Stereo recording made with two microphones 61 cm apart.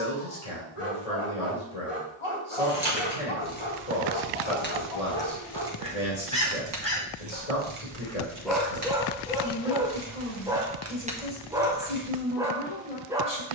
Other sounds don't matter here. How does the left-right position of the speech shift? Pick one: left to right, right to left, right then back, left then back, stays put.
stays put.